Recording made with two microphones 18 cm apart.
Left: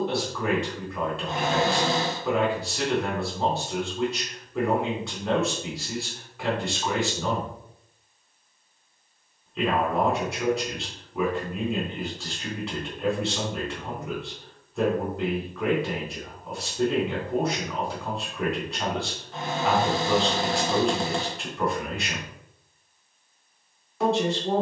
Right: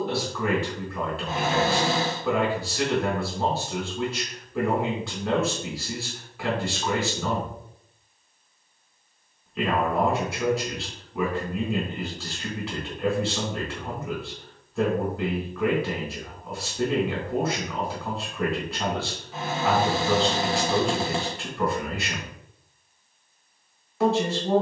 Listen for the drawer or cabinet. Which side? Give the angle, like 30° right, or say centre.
centre.